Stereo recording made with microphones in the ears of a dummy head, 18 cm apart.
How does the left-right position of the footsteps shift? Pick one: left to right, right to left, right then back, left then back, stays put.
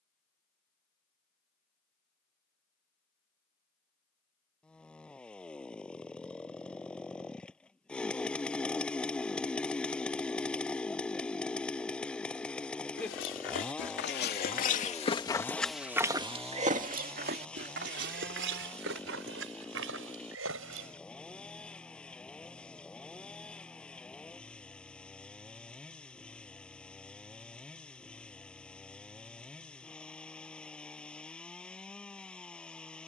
left to right.